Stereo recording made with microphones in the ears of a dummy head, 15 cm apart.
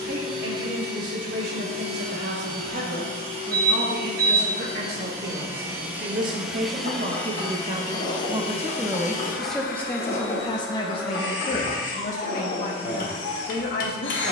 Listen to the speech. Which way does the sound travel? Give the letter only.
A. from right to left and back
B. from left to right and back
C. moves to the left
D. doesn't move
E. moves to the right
C.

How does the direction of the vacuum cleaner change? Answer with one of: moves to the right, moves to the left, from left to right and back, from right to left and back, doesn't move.
moves to the left.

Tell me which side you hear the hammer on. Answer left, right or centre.
left.